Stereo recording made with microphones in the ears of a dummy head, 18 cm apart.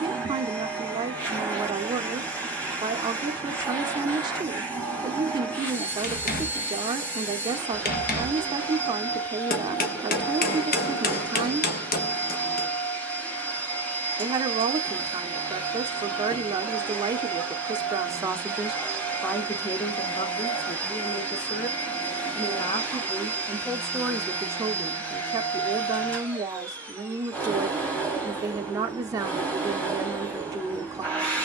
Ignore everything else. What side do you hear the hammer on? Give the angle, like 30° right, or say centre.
50° left.